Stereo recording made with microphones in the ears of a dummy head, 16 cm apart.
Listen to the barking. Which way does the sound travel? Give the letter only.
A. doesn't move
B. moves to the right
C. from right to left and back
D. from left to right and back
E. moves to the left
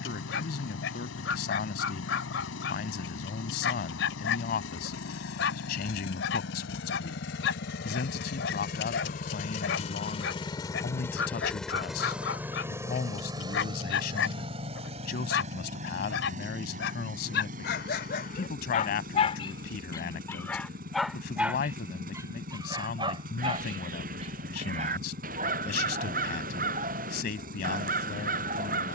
B.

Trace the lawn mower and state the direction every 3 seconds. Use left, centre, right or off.
left, left, left, left, right, right, right, right, right, right.